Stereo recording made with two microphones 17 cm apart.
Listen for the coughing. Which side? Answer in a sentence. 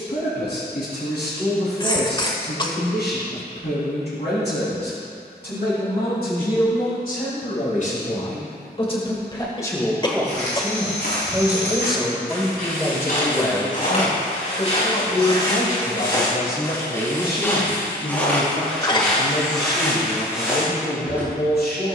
You can hear the coughing on the left.